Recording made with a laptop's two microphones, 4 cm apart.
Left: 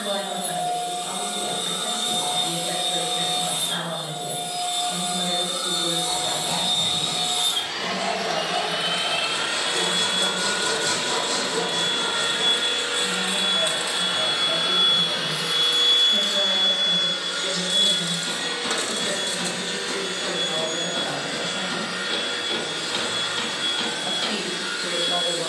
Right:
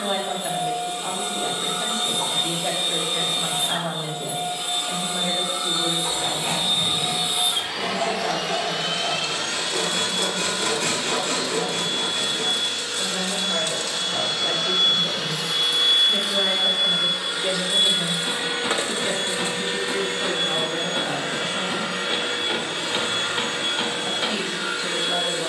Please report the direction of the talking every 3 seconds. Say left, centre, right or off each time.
right, right, right, right, right, right, right, centre, centre.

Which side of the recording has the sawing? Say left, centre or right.
right.